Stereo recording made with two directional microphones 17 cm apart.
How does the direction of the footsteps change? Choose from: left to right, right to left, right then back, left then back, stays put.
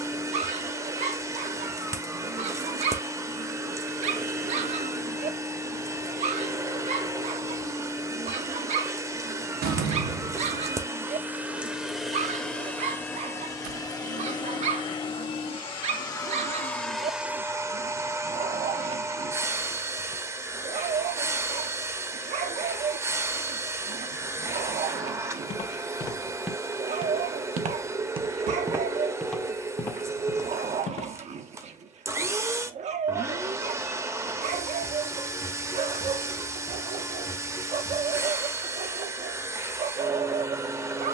right then back.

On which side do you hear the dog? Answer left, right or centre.
right.